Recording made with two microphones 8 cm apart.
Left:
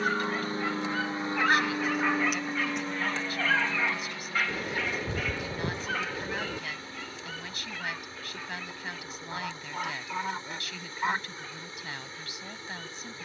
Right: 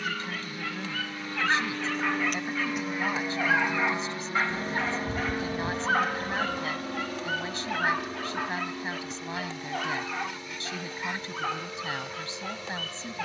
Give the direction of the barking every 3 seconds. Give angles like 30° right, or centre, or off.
10° left, 30° right, 60° right, 80° right, 80° right.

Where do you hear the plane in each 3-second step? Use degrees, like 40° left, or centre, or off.
20° left, 30° right, 50° right, 60° right, 70° right.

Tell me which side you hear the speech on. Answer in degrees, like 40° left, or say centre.
30° right.